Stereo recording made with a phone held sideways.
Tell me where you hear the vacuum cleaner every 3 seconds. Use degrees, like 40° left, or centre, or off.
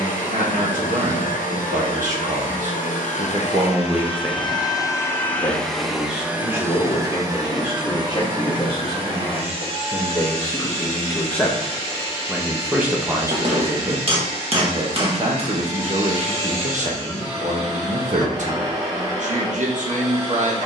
50° left, 30° left, 20° right, 40° right, 40° right, 40° right, 40° right.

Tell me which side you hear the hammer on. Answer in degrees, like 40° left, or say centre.
40° right.